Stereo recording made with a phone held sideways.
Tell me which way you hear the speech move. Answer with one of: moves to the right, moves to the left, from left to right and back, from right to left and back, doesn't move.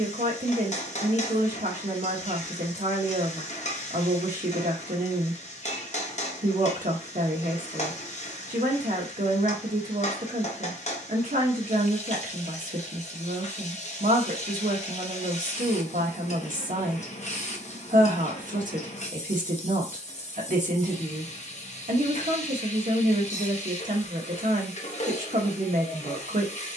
doesn't move.